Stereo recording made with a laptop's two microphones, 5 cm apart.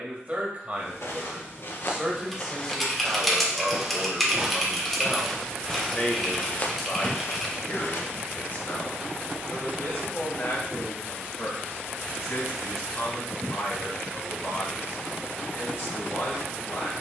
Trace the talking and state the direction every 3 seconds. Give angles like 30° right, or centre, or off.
20° right, 10° left, 40° left, 60° left, 70° left, 70° left.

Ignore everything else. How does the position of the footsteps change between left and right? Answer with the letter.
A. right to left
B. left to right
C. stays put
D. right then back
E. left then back
D.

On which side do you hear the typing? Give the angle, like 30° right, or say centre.
centre.